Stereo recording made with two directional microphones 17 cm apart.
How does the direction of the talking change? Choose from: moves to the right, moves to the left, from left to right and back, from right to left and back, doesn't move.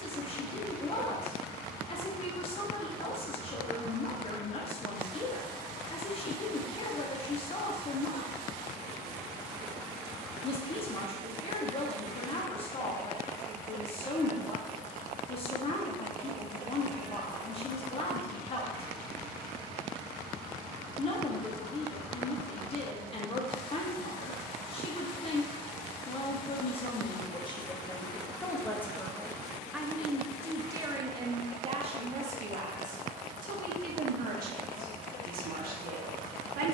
moves to the right.